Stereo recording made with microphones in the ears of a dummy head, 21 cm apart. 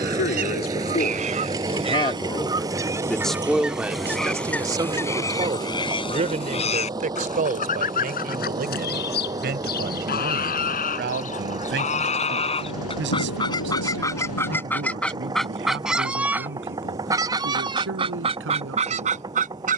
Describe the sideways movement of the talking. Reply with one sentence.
You can hear the talking go from the left side to the right.